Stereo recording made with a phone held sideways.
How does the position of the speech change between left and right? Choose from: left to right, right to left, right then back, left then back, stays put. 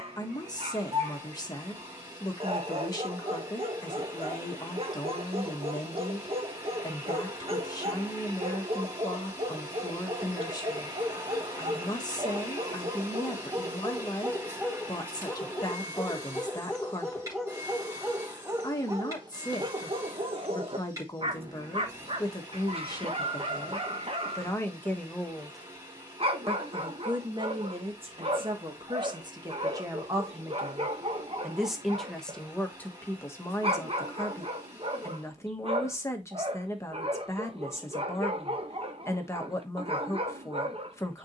right then back.